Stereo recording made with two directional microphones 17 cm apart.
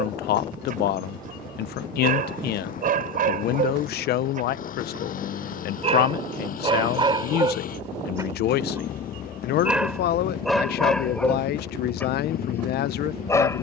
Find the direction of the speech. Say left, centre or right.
left.